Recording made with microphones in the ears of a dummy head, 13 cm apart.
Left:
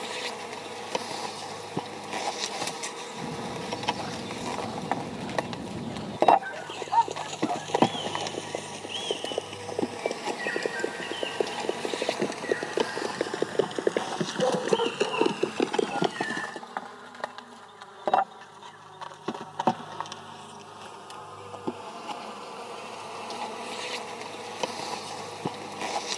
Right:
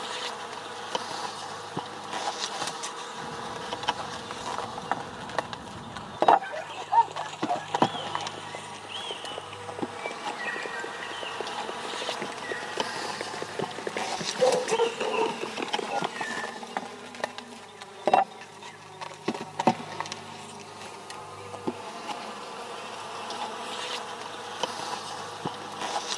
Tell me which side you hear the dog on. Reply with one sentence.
You can hear the dog on the right.